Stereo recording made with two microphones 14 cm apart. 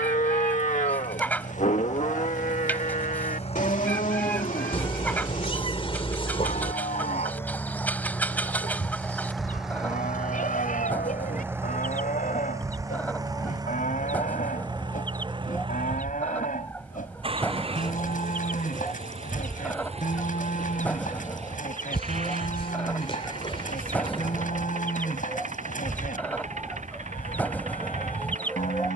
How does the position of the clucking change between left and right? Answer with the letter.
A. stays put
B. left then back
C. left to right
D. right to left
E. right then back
A.